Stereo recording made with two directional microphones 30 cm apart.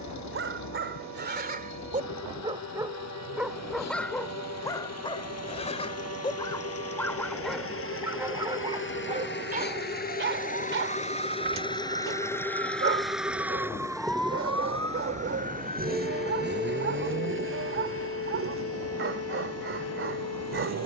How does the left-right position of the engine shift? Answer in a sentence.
You can hear the engine travel towards the right.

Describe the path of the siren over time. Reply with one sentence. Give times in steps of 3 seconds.
You can hear the siren on the right from 0 s, in the centre from 12 s and on the left from 15 s.